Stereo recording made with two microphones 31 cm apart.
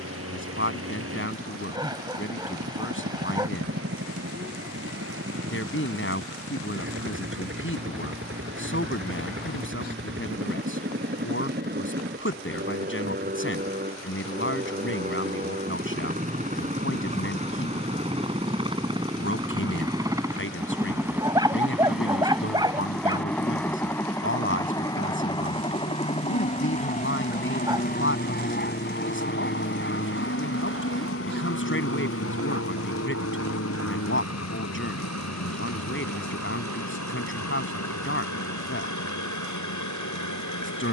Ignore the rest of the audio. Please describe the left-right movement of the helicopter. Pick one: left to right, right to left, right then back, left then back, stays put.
right to left.